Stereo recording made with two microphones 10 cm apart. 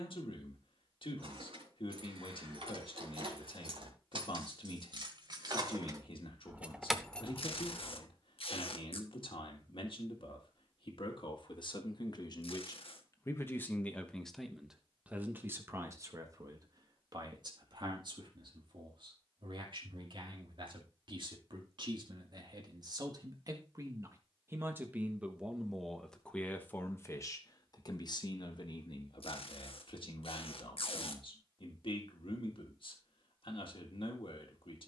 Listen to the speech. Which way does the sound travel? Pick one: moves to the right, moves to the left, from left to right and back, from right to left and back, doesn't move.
from left to right and back.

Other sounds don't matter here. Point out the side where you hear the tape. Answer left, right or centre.
left.